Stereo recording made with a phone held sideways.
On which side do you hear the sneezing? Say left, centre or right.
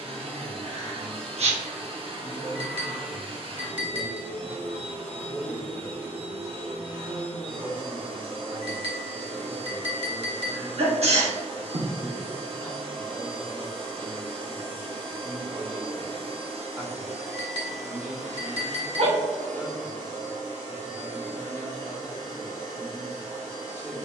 right.